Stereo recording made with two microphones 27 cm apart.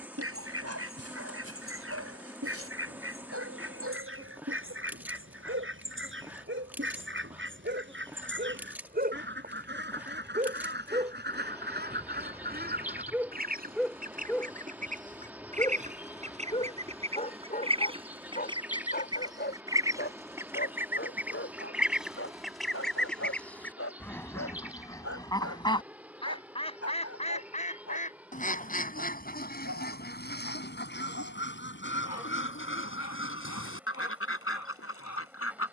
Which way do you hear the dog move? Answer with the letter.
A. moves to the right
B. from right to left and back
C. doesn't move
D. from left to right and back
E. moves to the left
E.